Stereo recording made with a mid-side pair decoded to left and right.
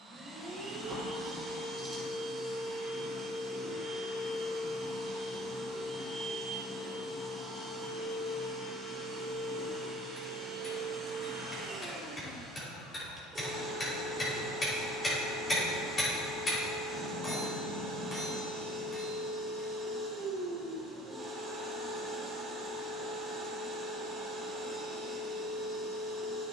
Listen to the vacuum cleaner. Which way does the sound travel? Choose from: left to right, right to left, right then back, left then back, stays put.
stays put.